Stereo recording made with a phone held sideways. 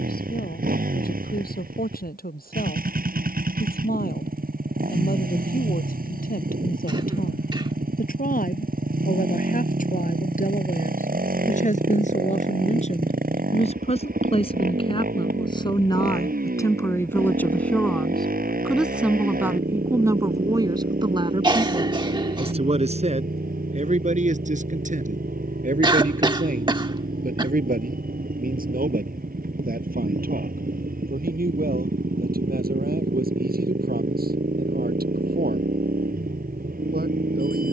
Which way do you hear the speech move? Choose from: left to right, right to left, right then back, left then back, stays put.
left to right.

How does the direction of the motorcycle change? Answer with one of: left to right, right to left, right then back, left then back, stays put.
stays put.